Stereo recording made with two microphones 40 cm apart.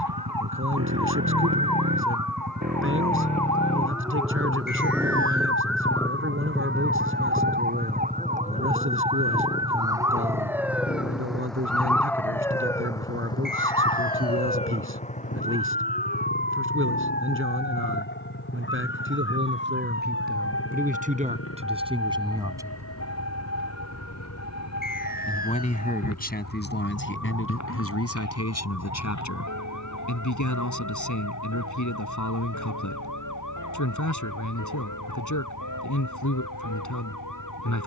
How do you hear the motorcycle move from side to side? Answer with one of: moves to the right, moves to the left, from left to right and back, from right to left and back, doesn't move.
moves to the left.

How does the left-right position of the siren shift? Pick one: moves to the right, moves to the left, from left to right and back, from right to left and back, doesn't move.
moves to the left.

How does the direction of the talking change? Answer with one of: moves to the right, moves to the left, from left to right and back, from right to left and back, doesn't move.
moves to the left.